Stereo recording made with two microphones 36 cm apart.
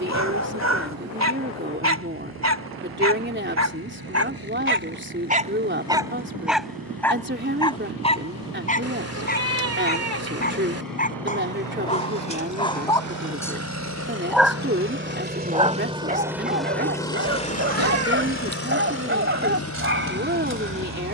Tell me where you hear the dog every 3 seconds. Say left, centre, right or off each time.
right, right, centre, left, centre, right, right.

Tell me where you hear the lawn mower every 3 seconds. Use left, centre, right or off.
right, right, right, right, right, centre, left.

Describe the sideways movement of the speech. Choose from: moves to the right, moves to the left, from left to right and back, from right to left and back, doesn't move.
doesn't move.